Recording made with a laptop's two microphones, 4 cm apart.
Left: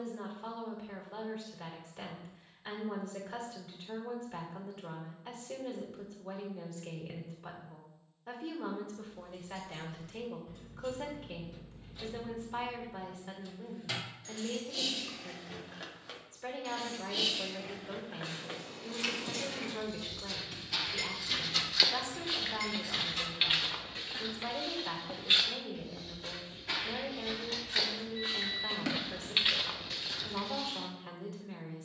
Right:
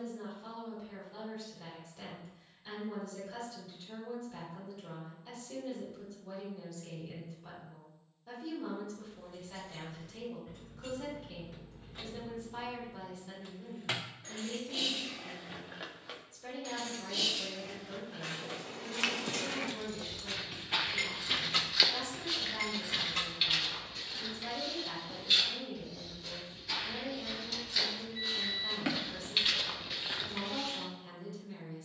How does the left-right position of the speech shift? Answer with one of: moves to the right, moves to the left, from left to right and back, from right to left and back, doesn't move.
doesn't move.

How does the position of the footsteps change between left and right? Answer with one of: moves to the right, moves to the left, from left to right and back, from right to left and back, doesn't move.
from right to left and back.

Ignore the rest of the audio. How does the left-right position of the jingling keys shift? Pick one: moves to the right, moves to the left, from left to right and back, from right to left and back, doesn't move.
from right to left and back.